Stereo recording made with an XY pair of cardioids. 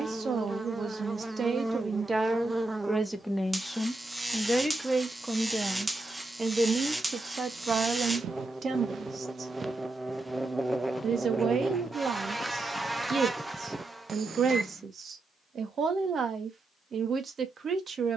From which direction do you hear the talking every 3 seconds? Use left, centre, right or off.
right, centre, right, right, right, right.